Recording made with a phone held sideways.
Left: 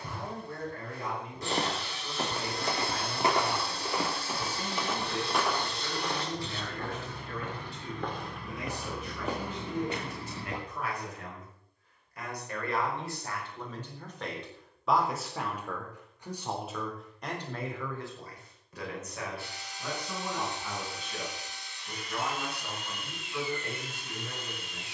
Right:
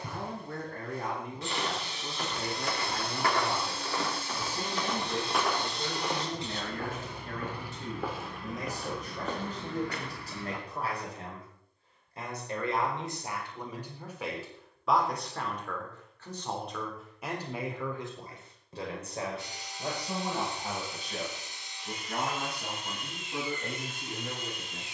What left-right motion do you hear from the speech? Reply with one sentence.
You can hear the speech go left and come back.